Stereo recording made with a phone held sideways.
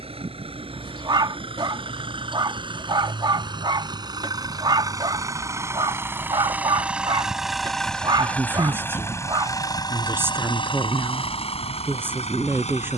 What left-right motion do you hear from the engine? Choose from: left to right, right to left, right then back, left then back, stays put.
right to left.